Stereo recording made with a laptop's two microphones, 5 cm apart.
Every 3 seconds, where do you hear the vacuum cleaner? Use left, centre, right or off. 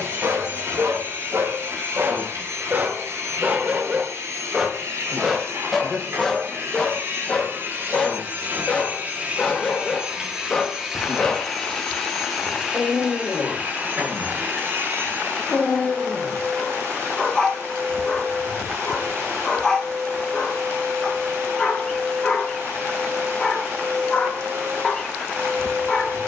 right, right, right, centre, right, right, right, right, right.